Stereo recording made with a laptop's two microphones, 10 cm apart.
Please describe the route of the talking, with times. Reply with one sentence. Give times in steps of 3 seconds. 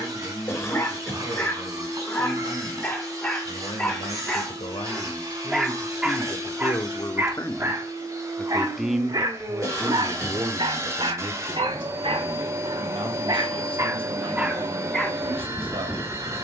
In this clip you hear the talking on the left from 0 s and on the right from 9 s.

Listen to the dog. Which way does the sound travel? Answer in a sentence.
In this clip you hear the dog move from left to right and back again.